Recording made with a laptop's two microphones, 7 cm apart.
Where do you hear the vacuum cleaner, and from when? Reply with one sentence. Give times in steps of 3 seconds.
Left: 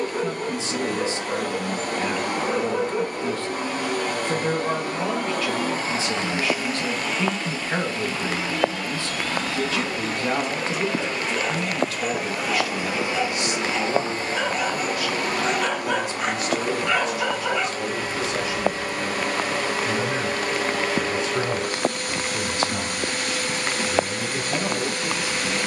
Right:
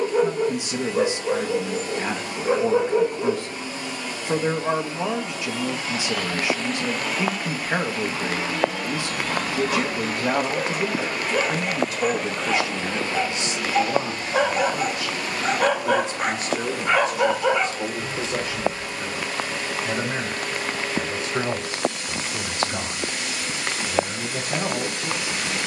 You can hear the vacuum cleaner on the left from 0 s, in the centre from 6 s and on the left from 12 s.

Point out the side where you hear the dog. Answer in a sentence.
You can hear the dog on the right.